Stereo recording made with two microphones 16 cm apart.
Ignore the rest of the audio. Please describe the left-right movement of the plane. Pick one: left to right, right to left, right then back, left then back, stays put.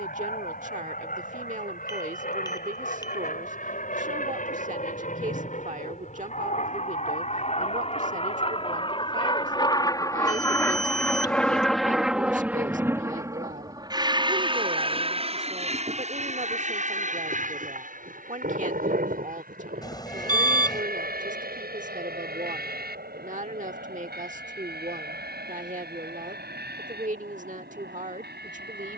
left to right.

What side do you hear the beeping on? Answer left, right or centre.
left.